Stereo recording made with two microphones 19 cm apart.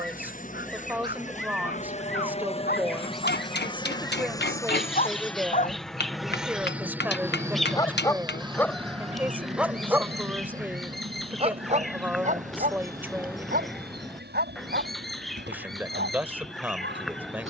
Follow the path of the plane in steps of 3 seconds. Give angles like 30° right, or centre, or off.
40° left, 20° left, 10° right, 40° right, 50° right, 60° right.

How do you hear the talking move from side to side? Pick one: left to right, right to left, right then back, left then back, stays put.
stays put.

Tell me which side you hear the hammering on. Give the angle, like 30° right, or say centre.
60° left.